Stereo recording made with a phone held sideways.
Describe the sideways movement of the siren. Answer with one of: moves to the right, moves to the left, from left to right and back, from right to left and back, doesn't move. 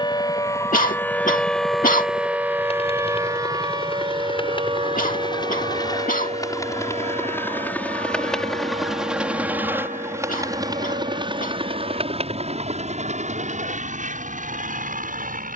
moves to the right.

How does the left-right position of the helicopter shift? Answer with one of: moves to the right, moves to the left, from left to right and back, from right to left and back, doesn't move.
moves to the right.